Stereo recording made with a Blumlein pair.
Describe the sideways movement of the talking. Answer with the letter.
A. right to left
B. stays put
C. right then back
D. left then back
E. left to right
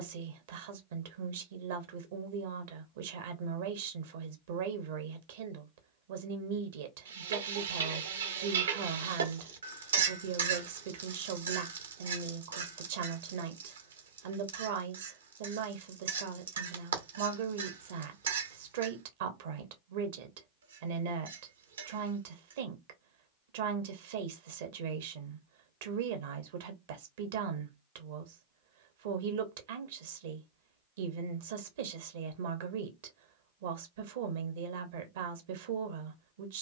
B.